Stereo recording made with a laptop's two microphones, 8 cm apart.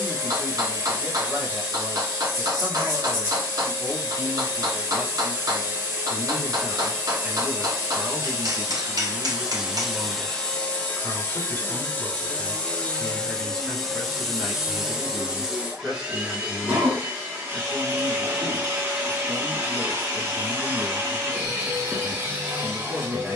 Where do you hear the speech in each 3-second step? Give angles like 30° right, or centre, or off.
30° right, 30° right, 20° right, 20° left, 10° left, 20° right, 20° right, 20° right.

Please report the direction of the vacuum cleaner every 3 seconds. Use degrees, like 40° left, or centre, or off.
30° right, 30° right, 30° right, 10° left, 10° left, 20° right, 30° right, 30° right.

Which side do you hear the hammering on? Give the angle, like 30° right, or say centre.
50° right.